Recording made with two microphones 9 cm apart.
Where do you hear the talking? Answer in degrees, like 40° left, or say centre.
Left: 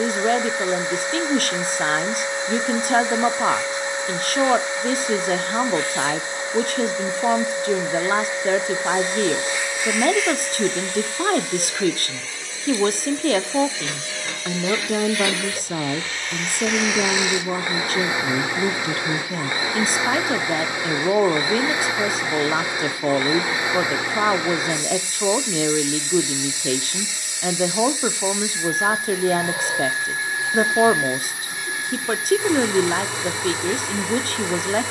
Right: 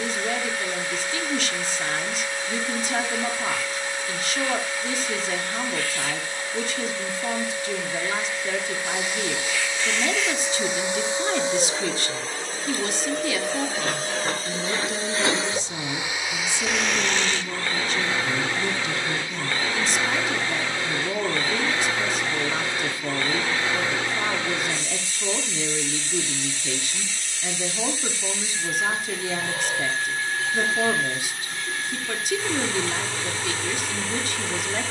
50° left.